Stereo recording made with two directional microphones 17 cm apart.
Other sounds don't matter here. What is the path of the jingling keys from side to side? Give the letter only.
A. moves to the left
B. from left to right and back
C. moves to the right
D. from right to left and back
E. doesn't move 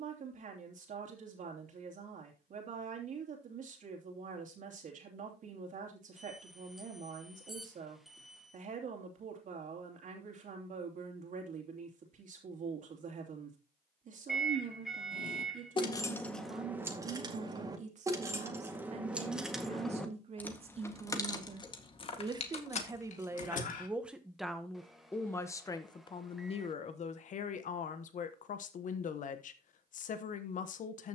B.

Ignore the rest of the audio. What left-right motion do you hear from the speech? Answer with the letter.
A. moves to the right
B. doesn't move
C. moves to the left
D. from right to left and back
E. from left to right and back
C.